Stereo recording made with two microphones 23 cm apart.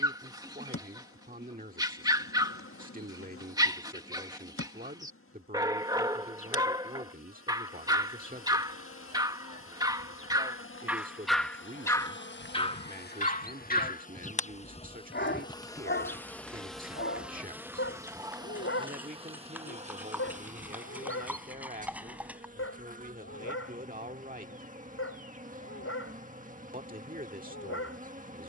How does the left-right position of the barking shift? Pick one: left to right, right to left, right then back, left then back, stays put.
right to left.